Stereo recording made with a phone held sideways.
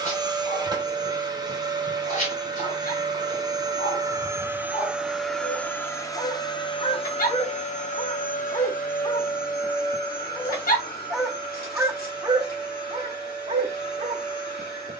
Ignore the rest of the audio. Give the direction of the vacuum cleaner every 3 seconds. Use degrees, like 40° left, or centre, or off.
30° right, 10° right, 40° left, 70° left, 70° left.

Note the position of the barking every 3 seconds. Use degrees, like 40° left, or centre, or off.
60° left, 50° left, 40° left, 10° left, 40° right.